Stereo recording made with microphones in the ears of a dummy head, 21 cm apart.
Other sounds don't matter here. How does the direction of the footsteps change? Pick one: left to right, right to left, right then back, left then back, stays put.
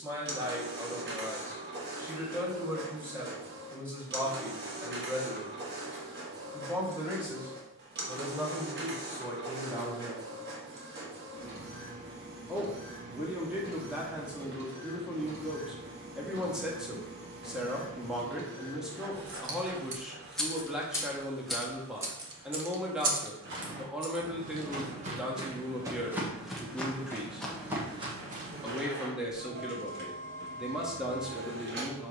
left then back.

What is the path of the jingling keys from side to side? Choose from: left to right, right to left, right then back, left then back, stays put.
left then back.